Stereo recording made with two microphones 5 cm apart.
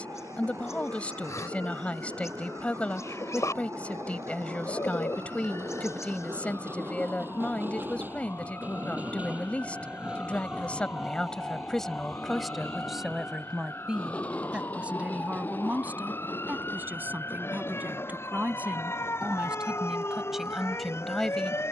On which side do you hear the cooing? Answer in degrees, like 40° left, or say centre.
70° left.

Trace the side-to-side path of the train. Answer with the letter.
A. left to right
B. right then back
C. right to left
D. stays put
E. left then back
C.